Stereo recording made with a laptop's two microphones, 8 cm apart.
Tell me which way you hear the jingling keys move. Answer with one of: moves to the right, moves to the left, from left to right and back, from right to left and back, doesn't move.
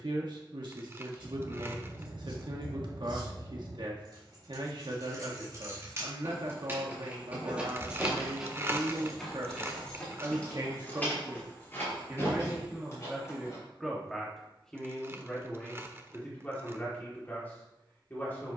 moves to the left.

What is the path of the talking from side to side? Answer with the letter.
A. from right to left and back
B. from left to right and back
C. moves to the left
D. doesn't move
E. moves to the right
C.